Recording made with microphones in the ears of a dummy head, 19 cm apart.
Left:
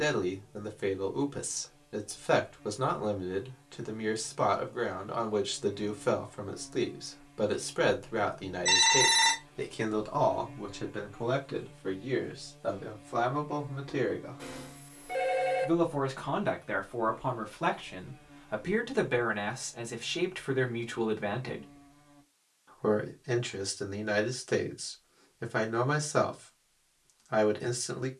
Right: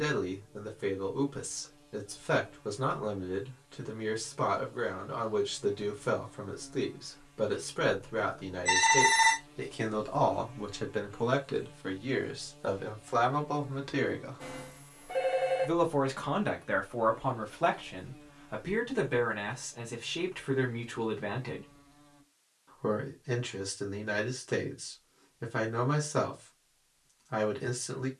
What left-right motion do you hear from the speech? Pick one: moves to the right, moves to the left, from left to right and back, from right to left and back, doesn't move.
from left to right and back.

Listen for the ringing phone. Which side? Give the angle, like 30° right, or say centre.
30° left.